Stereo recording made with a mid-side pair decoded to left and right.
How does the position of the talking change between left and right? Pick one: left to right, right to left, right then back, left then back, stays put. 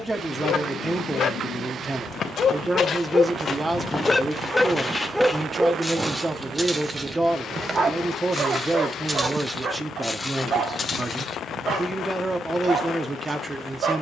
stays put.